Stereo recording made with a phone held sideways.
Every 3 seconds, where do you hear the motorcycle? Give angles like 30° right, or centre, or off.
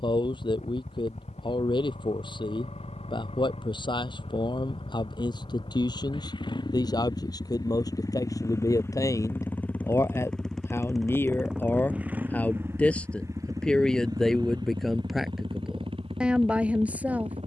60° left, 50° left, 30° left, centre, 20° right, 40° right.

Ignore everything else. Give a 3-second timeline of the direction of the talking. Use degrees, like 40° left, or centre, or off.
40° left, 40° left, 30° left, 20° left, 10° left, 10° right.